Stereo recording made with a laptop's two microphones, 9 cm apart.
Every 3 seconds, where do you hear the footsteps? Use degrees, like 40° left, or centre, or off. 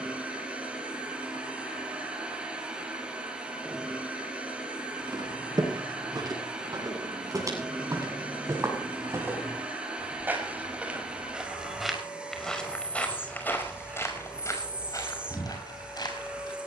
off, 50° right, 40° right, 20° right, 20° left, 50° left.